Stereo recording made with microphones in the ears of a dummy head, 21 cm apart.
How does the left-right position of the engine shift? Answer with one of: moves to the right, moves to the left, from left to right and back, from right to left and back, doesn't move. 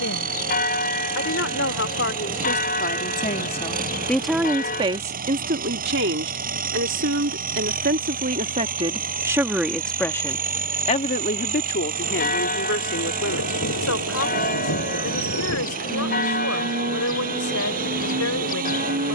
doesn't move.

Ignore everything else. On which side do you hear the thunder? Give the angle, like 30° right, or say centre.
60° left.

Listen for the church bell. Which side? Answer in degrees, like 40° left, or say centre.
40° left.